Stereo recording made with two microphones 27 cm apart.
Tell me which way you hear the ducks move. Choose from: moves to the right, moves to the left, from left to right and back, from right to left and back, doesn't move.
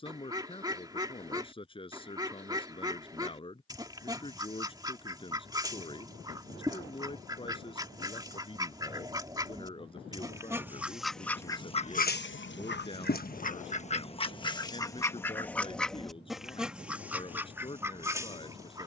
from right to left and back.